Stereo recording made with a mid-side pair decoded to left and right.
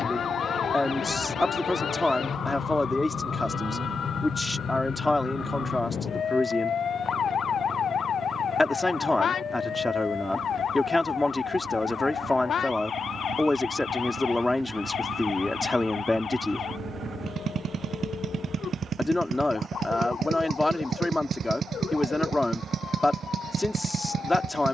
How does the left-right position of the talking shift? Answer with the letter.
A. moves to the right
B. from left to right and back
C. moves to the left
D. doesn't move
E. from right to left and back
D.